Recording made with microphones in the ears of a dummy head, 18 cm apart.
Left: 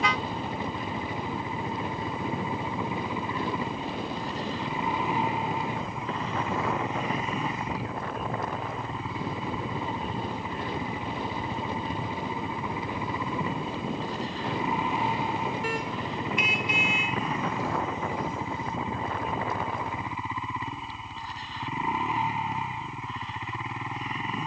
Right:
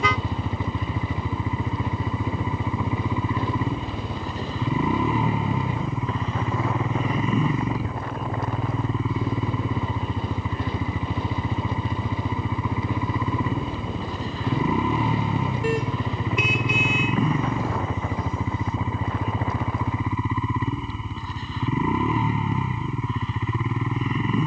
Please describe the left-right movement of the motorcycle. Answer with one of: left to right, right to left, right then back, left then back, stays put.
stays put.